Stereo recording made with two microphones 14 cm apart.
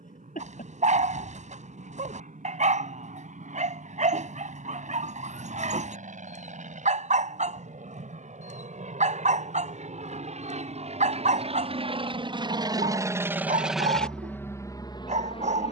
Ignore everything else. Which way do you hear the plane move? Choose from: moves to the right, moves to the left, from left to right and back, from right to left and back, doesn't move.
moves to the left.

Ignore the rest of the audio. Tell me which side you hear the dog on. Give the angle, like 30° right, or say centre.
60° right.